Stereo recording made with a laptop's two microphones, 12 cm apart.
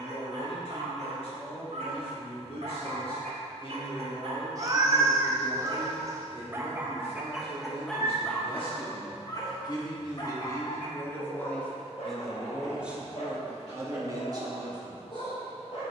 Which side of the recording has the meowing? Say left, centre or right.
right.